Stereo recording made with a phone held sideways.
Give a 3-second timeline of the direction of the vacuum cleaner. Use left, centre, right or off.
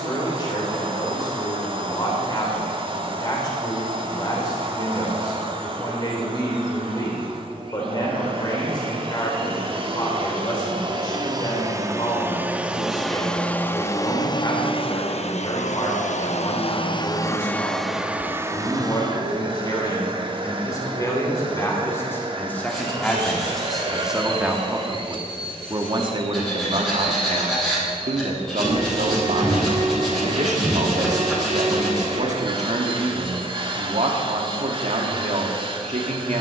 right, right, right, right, centre, left, right, right, right, right, right, right.